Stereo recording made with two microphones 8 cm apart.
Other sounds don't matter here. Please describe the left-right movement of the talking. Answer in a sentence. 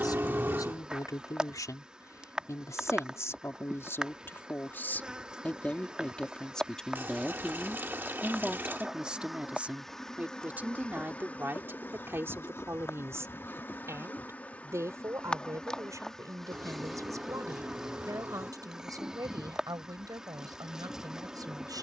In this clip you hear the talking move from left to right.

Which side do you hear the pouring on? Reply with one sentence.
You can hear the pouring on the right.